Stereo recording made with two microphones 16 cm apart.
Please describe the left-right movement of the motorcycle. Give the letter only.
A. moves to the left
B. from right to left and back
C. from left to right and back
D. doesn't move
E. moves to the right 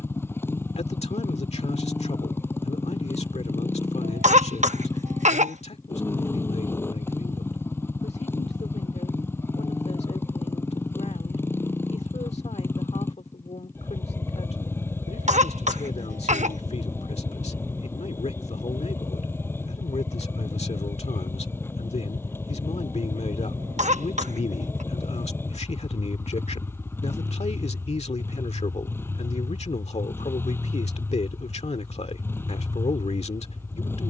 D.